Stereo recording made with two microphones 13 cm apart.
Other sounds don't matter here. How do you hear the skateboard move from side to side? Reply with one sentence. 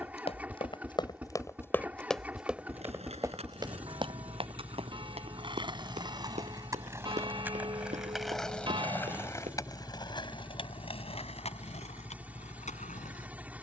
In this clip you hear the skateboard move from right to left.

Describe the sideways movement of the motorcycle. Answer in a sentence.
You can hear the motorcycle stay in one place.